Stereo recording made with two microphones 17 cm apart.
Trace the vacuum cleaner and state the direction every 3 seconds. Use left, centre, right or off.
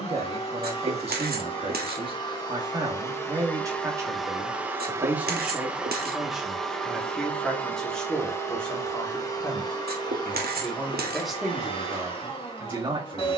left, centre, centre, left, left.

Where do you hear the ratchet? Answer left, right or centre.
right.